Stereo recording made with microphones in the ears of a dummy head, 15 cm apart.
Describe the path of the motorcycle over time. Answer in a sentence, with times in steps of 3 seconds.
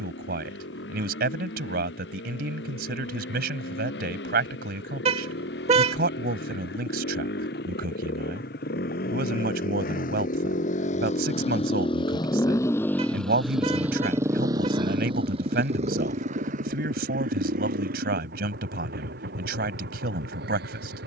You can hear the motorcycle on the left from 0 s, in the centre from 12 s and on the right from 15 s.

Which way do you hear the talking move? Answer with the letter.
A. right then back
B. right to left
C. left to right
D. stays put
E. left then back
D.